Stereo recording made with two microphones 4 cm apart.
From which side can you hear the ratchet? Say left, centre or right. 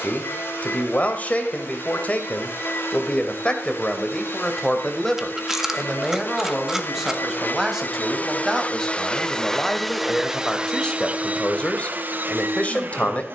centre.